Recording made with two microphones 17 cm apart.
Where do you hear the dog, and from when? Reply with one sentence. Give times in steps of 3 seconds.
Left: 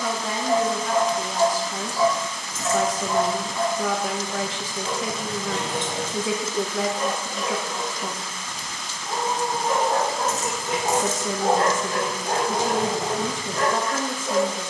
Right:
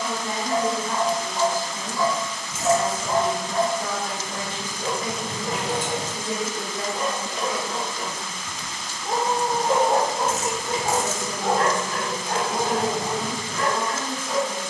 You can hear the dog on the left from 0 s, on the right from 3 s, in the centre from 9 s and on the left from 12 s.